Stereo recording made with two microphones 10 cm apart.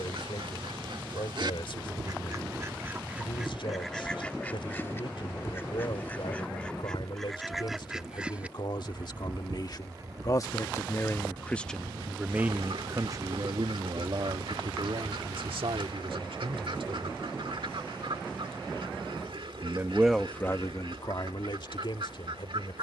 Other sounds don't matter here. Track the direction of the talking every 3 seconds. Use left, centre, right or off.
left, left, left, left, right, right, centre, left.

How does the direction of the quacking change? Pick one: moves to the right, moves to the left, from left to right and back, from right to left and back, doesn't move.
from right to left and back.